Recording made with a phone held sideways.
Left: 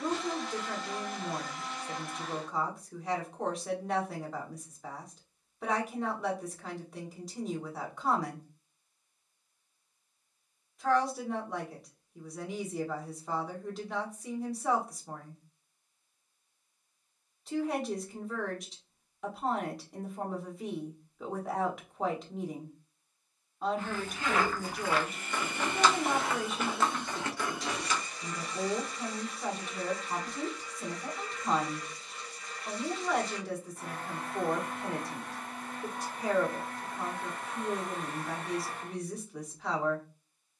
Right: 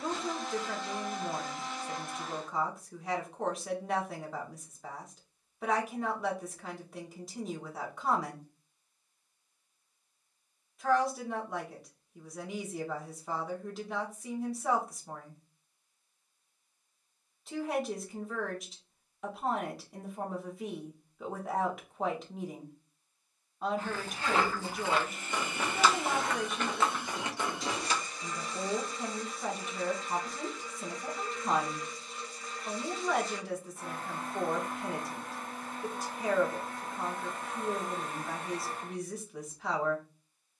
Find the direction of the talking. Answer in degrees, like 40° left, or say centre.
centre.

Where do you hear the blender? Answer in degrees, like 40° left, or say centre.
centre.